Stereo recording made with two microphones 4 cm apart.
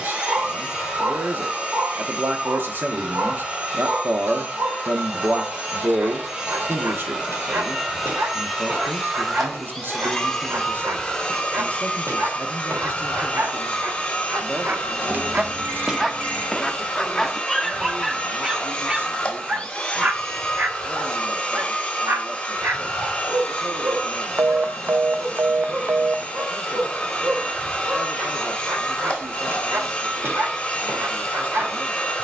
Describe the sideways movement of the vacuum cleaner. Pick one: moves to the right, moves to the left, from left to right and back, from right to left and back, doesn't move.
moves to the left.